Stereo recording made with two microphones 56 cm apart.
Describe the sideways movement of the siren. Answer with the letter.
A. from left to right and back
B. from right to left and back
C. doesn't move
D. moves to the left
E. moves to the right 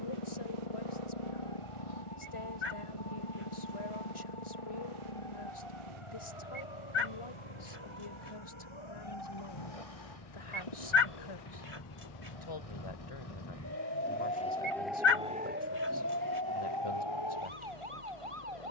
E.